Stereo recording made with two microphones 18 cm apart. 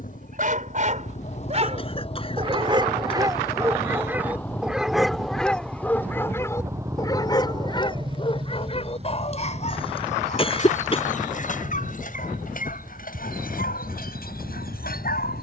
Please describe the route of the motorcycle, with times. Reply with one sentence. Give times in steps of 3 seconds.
You can hear the motorcycle on the left from 0 s, in the centre from 3 s and on the right from 6 s.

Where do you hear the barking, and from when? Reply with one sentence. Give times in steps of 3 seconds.
In this clip you hear the barking on the right from 0 s, in the centre from 3 s and on the left from 6 s.